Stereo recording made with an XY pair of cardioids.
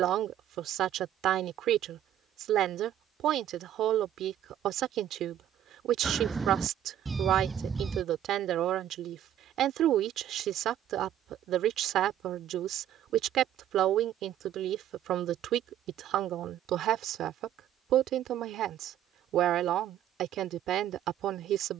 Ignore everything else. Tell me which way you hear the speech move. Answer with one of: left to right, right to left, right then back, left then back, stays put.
stays put.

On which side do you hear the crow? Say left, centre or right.
right.